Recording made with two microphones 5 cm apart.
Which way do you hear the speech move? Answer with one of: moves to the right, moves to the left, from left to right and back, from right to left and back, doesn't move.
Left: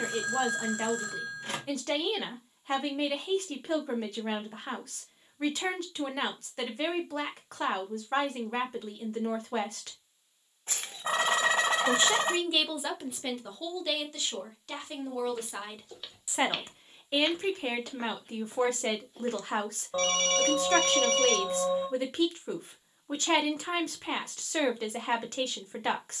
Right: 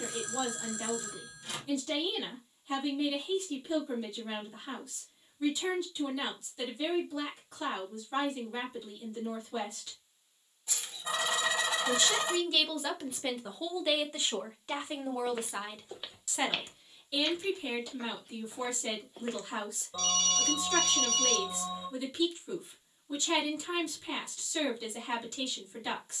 from left to right and back.